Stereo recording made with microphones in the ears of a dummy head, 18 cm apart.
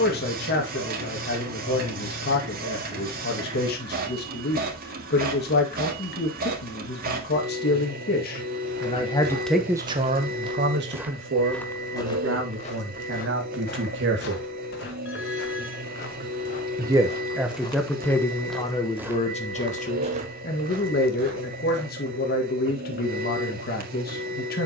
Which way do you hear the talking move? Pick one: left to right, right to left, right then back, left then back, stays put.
right then back.